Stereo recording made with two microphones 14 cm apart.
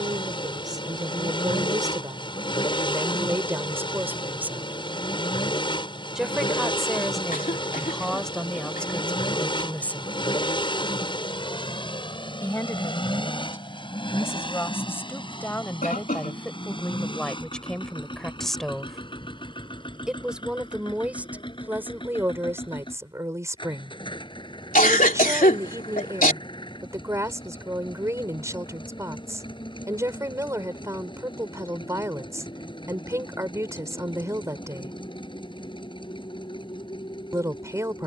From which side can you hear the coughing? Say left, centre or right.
left.